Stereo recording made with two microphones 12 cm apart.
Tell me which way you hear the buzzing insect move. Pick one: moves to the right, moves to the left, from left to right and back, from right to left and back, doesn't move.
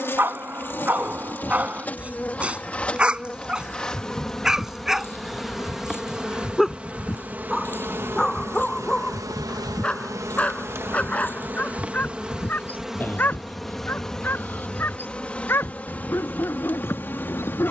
from left to right and back.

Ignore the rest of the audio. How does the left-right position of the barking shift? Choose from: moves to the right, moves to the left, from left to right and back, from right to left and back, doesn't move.
moves to the left.